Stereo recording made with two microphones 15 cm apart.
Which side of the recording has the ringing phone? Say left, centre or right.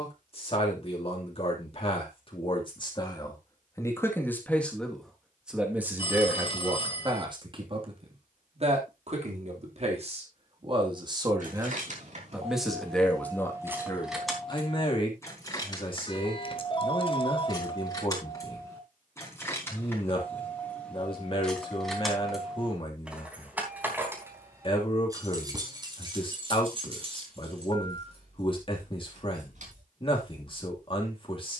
left.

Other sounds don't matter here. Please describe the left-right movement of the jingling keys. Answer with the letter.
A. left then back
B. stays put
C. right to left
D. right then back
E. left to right
A.